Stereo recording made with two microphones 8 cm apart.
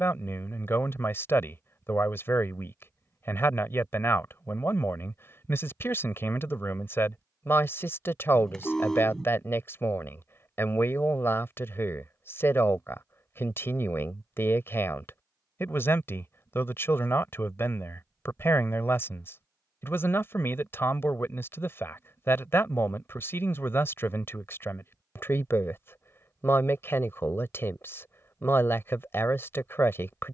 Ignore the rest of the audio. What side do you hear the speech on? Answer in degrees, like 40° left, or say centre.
30° left.